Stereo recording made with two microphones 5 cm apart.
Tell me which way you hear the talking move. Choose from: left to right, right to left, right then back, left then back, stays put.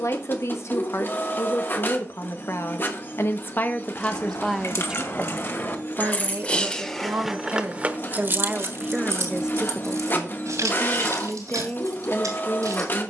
right then back.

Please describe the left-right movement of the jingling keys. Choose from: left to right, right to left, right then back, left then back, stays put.
left to right.